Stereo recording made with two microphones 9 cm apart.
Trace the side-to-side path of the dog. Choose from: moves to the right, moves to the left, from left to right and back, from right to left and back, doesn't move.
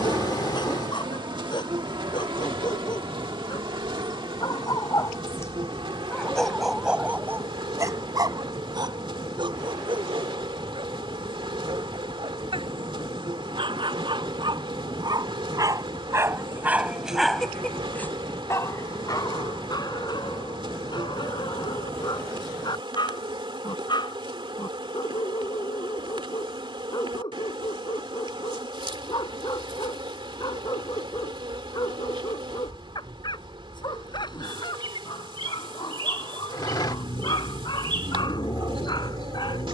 from left to right and back.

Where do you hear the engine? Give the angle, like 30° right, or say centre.
50° left.